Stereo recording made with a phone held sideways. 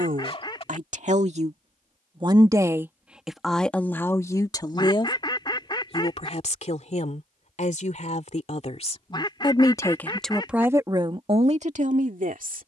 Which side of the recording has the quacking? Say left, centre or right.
left.